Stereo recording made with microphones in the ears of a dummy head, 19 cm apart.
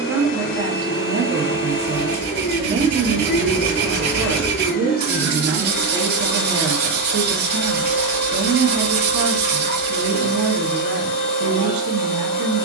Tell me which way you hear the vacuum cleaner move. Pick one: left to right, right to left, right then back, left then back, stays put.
stays put.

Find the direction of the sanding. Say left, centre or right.
right.